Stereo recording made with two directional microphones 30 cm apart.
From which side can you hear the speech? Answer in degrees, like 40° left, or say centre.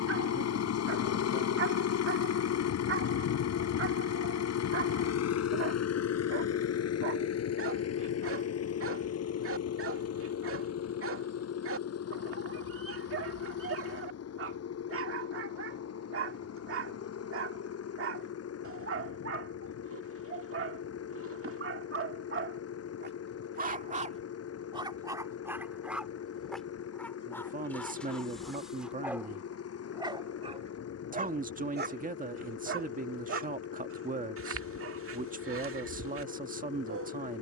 30° right.